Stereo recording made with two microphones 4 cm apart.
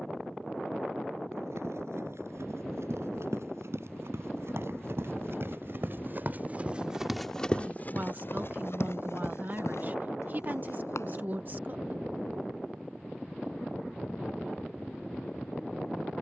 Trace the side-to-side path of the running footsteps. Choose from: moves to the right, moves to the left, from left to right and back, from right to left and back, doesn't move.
moves to the left.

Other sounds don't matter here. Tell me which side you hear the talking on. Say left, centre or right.
right.